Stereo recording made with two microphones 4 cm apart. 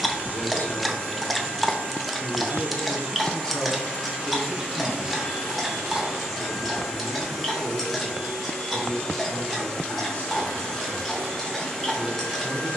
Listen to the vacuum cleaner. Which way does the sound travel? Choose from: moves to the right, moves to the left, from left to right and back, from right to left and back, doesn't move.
moves to the left.